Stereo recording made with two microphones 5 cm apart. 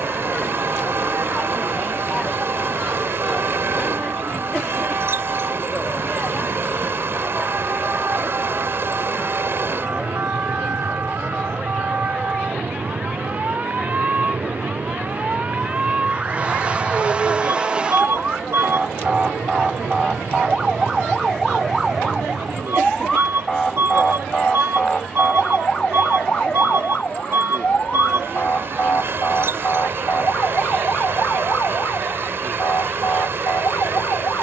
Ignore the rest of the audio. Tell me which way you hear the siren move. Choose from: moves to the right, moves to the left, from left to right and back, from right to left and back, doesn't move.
moves to the left.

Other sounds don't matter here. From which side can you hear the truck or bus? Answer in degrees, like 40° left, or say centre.
50° right.